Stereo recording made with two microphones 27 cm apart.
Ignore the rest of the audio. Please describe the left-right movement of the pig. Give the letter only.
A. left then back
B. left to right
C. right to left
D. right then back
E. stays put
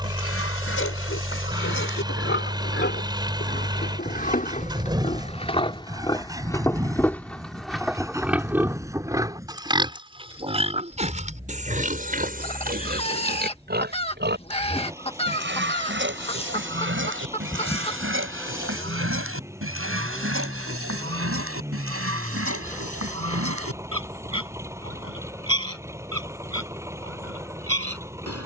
B.